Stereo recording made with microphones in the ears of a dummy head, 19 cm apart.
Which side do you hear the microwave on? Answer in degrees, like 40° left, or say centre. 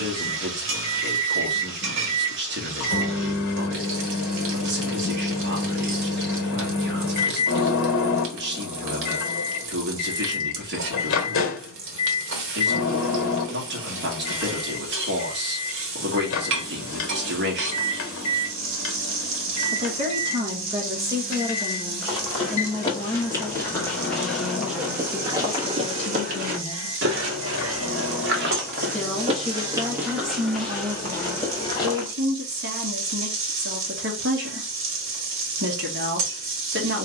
70° left.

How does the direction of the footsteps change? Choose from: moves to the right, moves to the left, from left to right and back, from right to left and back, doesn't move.
from left to right and back.